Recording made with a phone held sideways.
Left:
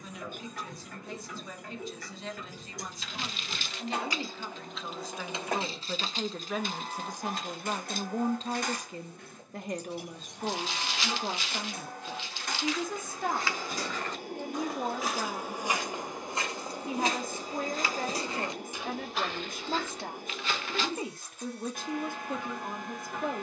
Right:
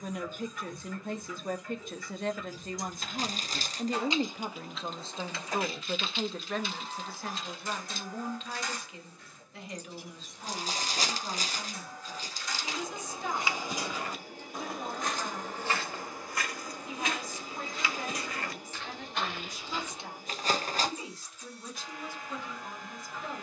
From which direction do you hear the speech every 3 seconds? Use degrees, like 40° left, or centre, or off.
50° right, 30° right, 20° left, 50° left, 60° left, 60° left, 60° left, 60° left.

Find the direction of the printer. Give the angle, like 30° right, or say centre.
60° left.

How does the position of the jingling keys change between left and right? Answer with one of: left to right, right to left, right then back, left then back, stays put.
right to left.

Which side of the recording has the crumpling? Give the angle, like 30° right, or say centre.
40° right.